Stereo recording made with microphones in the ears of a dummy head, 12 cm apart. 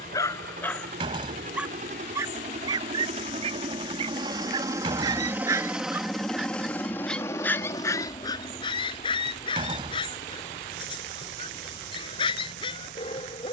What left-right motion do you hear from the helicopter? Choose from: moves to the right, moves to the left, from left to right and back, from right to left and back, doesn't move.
moves to the left.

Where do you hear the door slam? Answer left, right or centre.
right.